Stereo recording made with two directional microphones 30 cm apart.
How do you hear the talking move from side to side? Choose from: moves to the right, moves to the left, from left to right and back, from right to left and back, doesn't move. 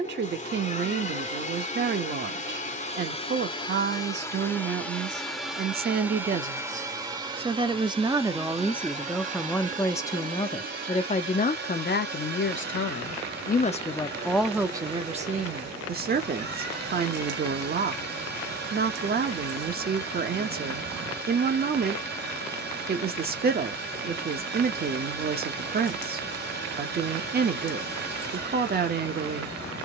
from right to left and back.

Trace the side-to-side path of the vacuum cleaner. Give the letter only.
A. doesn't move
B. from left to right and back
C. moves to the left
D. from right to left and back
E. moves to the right
E.